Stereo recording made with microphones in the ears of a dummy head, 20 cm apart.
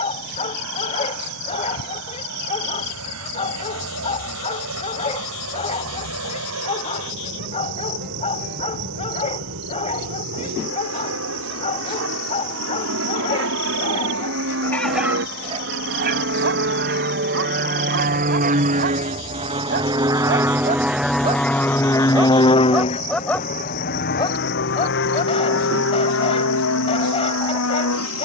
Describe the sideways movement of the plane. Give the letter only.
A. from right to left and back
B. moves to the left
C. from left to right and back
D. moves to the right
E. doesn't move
B.